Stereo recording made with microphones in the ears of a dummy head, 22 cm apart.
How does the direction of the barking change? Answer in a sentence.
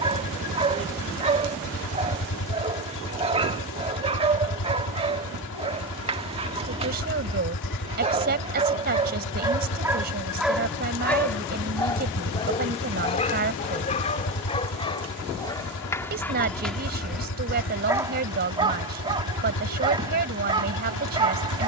You can hear the barking go left and come back.